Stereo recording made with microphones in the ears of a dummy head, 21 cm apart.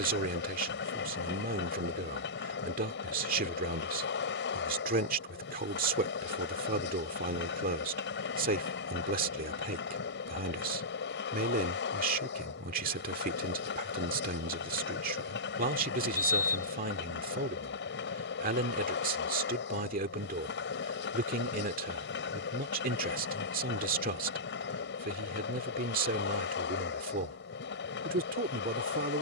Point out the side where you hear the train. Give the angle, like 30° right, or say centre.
50° left.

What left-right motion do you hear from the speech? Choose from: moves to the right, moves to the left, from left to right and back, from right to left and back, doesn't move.
doesn't move.